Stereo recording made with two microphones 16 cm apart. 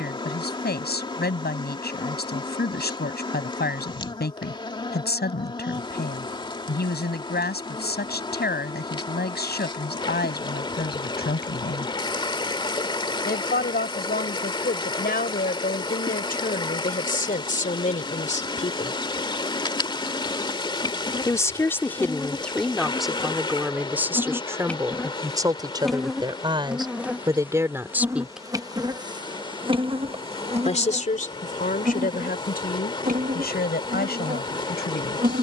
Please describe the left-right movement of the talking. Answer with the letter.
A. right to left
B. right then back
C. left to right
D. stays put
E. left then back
B.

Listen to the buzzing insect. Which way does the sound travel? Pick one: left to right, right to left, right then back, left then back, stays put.
left to right.